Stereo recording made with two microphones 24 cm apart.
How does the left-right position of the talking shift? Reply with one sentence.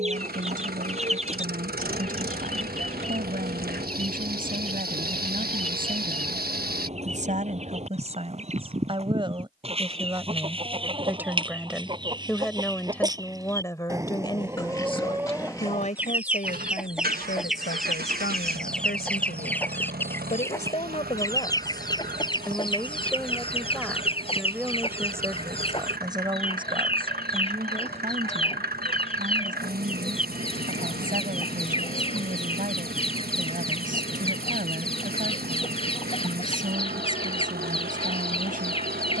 You can hear the talking go left and come back.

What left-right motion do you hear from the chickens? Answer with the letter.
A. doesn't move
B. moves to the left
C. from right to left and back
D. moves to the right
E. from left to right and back
B.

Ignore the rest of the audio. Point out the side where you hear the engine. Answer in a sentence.
In this clip you hear the engine on the right.